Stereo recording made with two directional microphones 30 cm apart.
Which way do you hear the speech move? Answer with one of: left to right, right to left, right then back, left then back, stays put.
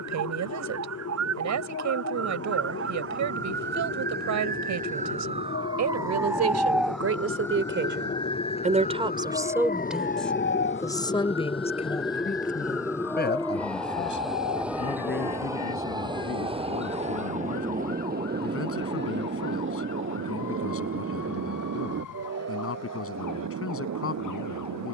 right to left.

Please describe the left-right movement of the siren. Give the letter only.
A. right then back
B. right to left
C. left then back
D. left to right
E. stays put
B.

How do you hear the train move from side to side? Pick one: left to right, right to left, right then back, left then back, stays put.
left to right.